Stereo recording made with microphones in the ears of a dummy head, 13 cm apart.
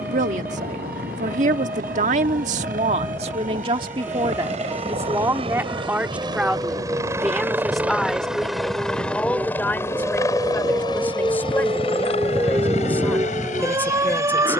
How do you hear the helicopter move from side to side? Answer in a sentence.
You can hear the helicopter go from the right side to the left.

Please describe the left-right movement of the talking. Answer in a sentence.
You can hear the talking go from the right side to the left.